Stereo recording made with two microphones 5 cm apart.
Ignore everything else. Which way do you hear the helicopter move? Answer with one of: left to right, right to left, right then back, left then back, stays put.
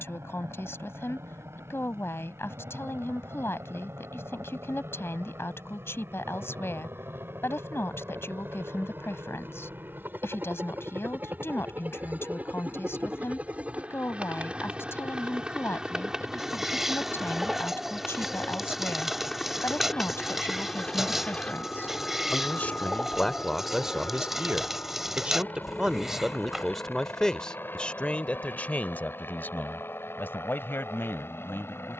right to left.